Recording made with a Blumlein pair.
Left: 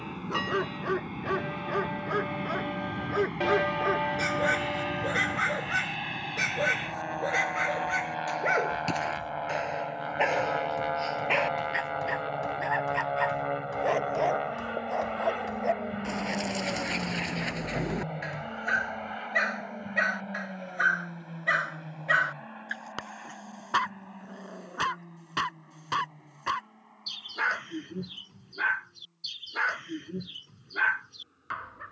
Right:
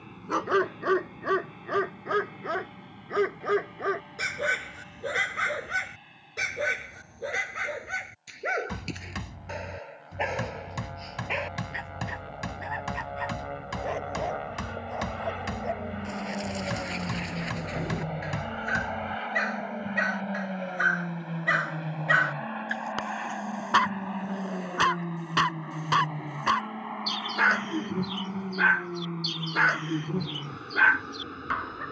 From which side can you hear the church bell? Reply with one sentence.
In this clip you hear the church bell on the left.